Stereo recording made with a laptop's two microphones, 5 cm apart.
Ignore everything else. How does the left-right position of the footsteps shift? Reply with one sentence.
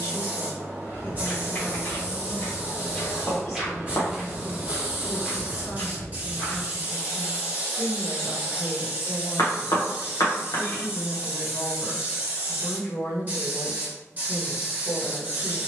You can hear the footsteps go right and come back.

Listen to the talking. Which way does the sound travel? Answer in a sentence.
You can hear the talking stay in one place.